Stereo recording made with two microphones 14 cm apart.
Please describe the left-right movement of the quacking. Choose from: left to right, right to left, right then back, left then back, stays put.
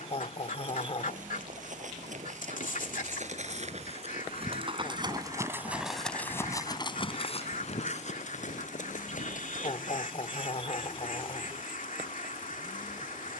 stays put.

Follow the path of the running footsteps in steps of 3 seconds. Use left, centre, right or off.
right, right, left, left, off.